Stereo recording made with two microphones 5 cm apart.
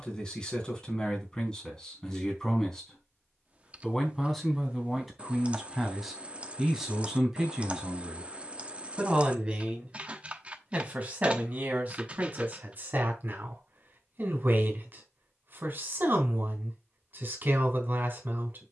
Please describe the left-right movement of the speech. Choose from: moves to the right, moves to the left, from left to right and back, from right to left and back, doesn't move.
moves to the right.